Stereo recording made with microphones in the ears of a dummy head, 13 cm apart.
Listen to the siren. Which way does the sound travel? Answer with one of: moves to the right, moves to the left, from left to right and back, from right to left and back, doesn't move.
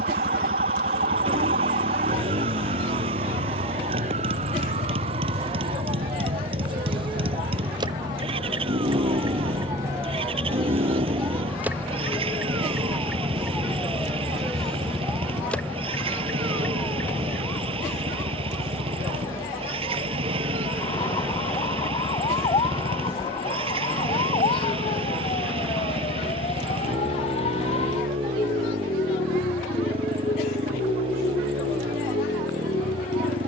moves to the left.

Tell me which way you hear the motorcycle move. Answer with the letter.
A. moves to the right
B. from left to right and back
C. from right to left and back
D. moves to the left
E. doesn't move
E.